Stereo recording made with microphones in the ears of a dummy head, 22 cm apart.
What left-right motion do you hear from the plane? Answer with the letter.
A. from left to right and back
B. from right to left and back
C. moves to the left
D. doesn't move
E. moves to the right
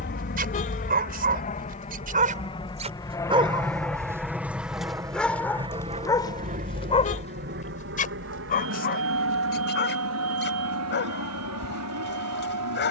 E.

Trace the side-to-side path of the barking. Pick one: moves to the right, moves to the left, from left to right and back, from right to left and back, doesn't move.
moves to the left.